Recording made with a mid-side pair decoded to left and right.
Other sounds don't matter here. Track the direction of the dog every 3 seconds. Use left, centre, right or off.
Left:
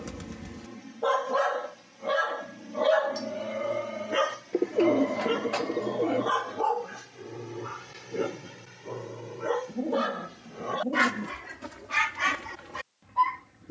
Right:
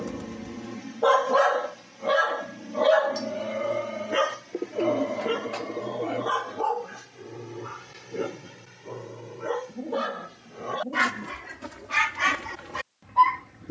right, centre, centre, centre, right.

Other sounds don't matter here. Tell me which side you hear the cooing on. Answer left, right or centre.
left.